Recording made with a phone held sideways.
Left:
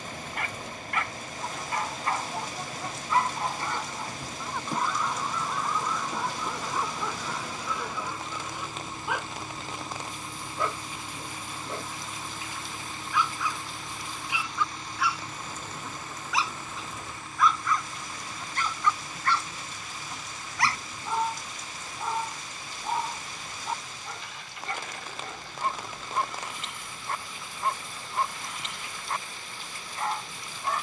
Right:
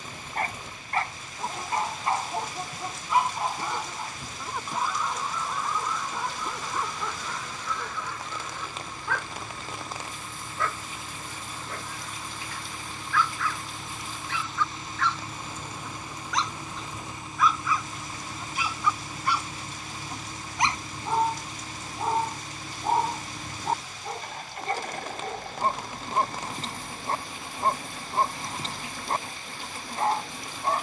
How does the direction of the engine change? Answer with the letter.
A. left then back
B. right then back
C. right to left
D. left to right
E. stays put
D.